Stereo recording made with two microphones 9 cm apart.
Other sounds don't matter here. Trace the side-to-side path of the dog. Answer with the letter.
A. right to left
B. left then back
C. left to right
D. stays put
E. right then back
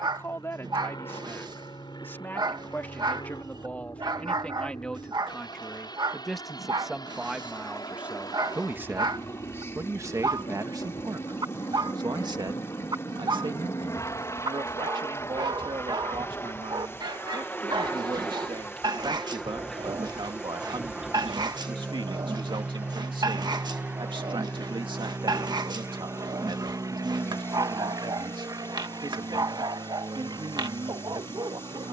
D.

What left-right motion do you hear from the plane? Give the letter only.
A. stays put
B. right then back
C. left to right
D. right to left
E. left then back
C.